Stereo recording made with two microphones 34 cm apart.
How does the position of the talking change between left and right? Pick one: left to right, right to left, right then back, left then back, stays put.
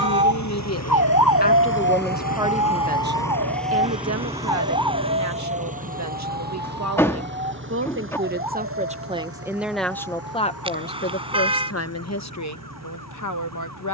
right then back.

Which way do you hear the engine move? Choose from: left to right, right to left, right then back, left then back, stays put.
left to right.